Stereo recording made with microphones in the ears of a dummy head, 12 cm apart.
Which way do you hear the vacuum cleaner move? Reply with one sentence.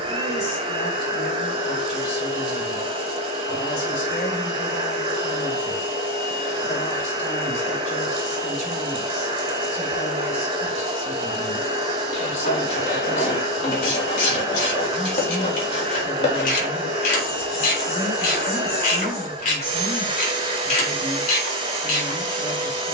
In this clip you hear the vacuum cleaner stay in one place.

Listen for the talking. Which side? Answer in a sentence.
In this clip you hear the talking on the left.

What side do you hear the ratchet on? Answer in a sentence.
You can hear the ratchet on the left.